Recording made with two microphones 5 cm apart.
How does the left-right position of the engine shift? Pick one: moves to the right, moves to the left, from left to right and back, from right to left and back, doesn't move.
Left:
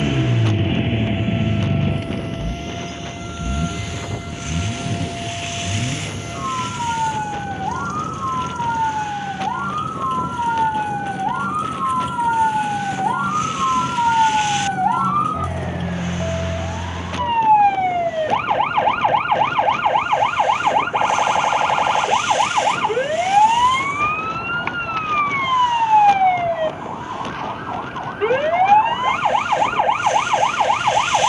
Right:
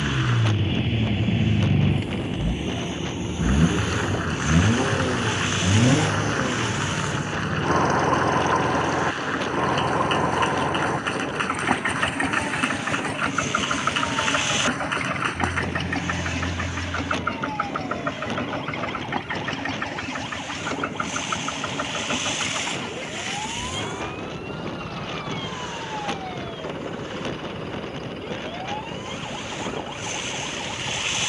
moves to the right.